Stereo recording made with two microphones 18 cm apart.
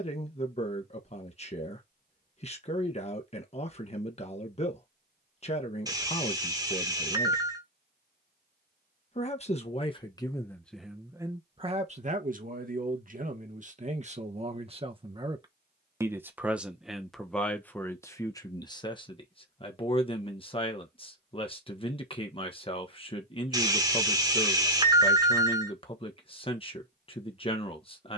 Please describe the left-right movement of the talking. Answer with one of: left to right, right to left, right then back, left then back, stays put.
right then back.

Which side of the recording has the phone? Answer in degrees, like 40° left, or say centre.
20° right.